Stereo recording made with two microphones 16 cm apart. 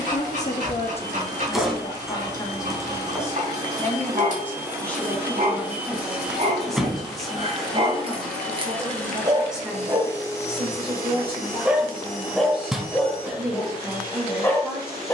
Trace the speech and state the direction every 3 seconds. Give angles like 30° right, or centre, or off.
40° left, 10° left, centre, 10° right, 10° right.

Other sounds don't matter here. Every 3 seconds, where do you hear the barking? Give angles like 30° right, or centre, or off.
50° right, 50° right, 40° right, 20° right, 10° left.